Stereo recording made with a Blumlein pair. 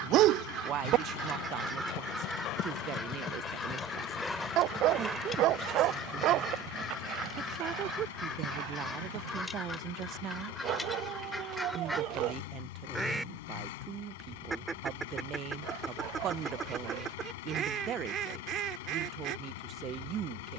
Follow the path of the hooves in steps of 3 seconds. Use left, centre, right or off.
left, centre, right, right, off, off, off.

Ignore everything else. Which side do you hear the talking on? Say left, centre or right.
right.